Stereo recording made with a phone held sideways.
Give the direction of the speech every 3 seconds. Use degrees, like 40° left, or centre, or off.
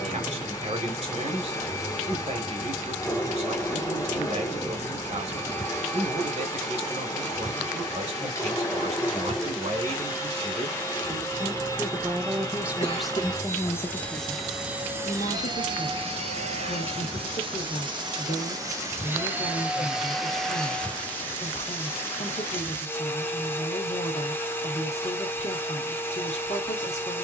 50° right, 50° right, 50° right, 40° right, centre, 50° left, 50° left, 50° left, 50° left.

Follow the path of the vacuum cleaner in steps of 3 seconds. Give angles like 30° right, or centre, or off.
20° left, 20° left, 20° left, 20° left, 10° left, 40° right, 10° right, 10° left, 20° left.